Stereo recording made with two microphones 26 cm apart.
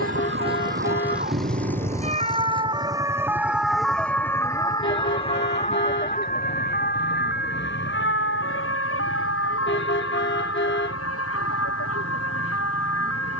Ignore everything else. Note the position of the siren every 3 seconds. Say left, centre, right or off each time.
right, centre, left, left, left.